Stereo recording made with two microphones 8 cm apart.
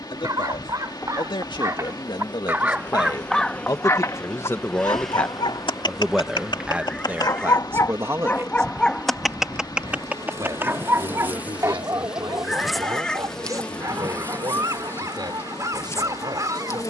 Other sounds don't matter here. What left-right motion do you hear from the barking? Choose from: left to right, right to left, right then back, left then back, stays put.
left then back.